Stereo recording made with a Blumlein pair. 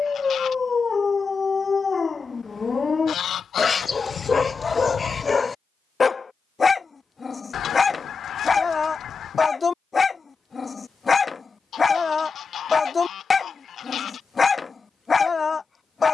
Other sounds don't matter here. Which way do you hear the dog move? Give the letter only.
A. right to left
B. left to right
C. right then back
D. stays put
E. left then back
D.